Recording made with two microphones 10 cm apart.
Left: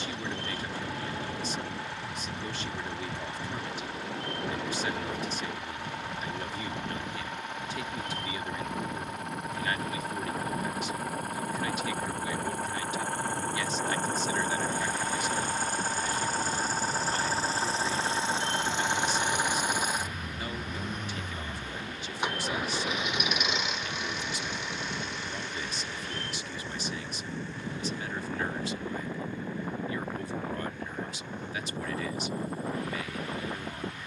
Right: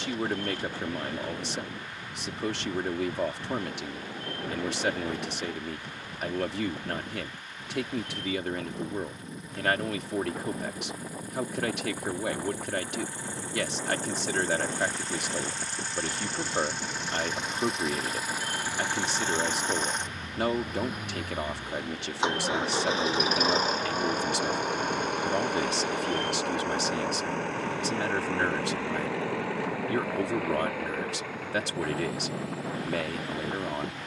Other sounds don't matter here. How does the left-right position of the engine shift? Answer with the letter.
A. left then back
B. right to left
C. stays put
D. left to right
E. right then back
D.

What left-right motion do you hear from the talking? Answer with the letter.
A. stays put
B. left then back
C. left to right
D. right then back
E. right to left
A.